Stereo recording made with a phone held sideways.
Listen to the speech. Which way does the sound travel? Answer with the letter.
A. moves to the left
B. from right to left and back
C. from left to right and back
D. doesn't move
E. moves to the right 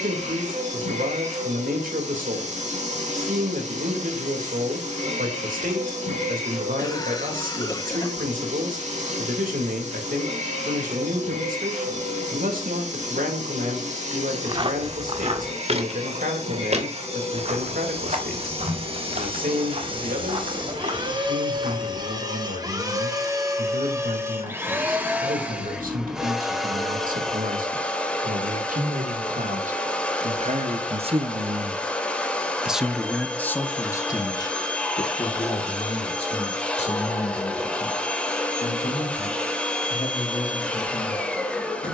A.